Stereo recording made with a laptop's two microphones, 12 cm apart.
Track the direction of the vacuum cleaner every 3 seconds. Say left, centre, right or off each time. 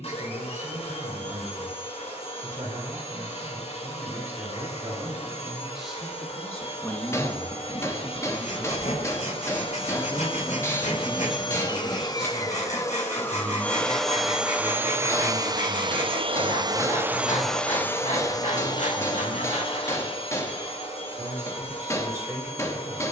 left, left, left, left, centre, right, left, left.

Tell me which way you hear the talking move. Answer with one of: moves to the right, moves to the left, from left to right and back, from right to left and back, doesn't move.
from right to left and back.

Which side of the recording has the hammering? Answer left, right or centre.
left.